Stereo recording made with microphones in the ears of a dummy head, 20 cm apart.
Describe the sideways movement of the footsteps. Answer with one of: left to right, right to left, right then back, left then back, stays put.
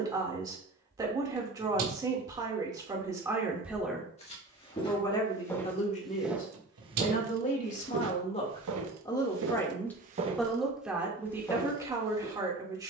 right then back.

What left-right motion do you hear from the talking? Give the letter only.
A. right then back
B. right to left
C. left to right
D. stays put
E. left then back
E.